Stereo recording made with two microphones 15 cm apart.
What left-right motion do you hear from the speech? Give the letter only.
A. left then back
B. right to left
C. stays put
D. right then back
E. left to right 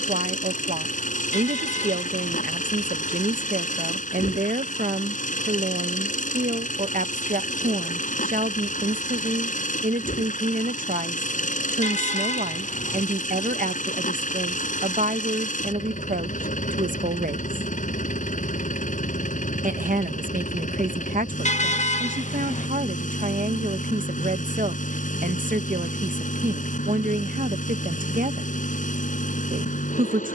C.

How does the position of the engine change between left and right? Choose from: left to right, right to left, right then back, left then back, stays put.
stays put.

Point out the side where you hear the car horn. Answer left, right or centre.
left.